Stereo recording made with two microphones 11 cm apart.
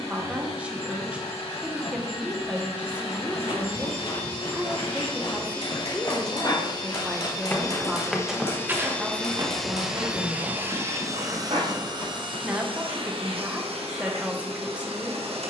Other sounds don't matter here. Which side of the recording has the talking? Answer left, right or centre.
centre.